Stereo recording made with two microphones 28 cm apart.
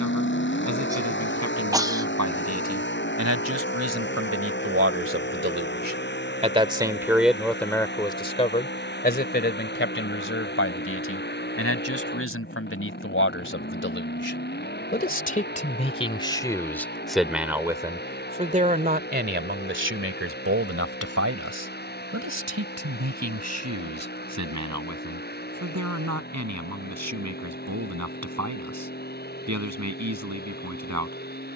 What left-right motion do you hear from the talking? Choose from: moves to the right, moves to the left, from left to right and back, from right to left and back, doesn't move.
from right to left and back.